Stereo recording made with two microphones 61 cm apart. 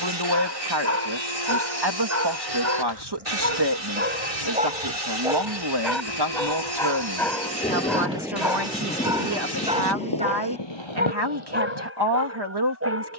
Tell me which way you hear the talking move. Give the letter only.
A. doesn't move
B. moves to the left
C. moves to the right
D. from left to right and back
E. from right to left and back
A.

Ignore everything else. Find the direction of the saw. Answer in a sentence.
You can hear the saw on the right.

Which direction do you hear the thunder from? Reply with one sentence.
You can hear the thunder in the centre.